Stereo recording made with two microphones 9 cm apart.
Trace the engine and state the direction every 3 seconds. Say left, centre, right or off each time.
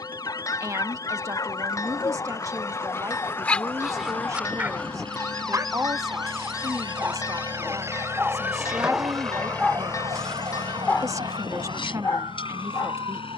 right, right, right, left, left.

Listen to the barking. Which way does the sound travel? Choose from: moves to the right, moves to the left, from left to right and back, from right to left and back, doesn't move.
from left to right and back.